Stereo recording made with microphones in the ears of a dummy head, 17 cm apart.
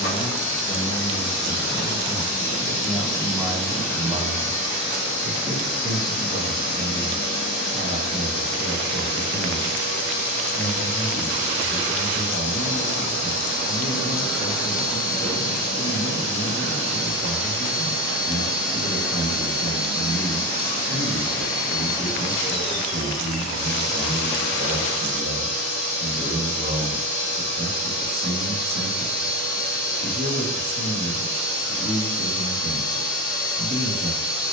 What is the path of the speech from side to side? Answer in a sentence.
You can hear the speech move from left to right.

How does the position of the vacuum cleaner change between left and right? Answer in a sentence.
In this clip you hear the vacuum cleaner stay in one place.